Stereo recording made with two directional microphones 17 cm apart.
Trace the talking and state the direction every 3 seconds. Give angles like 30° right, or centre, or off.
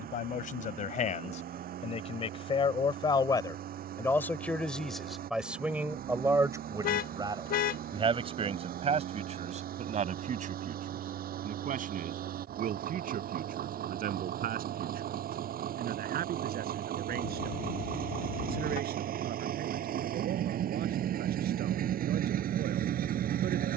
40° left, 10° left, 30° right, 50° right, 60° right, 60° right, 70° right, 70° right.